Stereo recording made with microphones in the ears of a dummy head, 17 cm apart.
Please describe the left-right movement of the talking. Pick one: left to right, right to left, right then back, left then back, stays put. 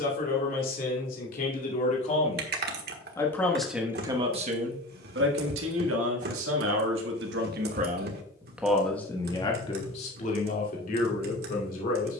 right then back.